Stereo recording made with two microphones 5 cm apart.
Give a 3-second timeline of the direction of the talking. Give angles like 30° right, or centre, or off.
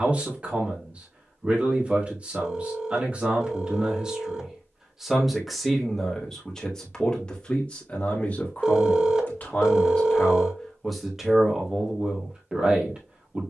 30° right, 10° right, 20° left, 10° left, 20° right.